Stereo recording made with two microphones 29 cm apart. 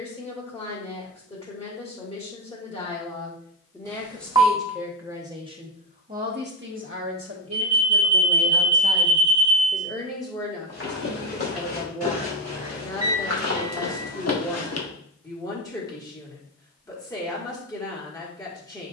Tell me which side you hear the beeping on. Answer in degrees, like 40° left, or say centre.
10° right.